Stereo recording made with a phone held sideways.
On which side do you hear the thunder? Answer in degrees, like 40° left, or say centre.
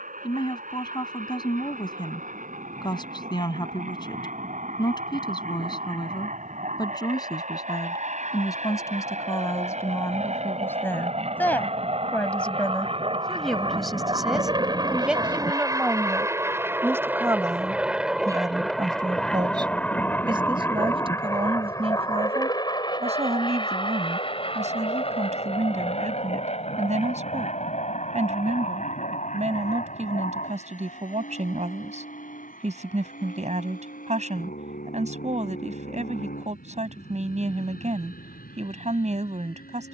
20° left.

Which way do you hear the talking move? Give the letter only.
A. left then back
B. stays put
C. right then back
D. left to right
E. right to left
D.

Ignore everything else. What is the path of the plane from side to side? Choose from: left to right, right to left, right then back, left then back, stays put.
right to left.